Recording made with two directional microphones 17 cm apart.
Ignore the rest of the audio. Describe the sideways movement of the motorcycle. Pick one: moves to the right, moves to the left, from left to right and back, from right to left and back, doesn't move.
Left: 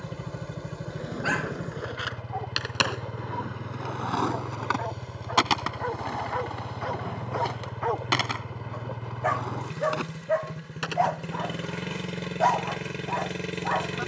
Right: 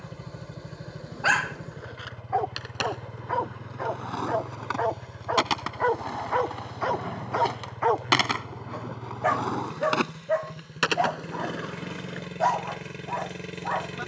doesn't move.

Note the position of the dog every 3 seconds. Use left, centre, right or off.
right, right, right, centre, centre.